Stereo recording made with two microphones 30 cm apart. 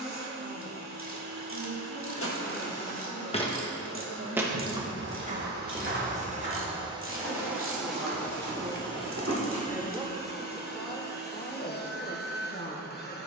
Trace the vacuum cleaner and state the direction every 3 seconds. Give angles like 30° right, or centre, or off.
60° right, 40° right, 10° right, 30° left, 30° left.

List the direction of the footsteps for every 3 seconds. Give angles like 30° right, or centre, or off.
40° left, 20° right, 50° right, 50° right, off.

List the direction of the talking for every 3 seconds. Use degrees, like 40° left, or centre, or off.
60° right, 50° right, 30° right, 10° left, 30° left.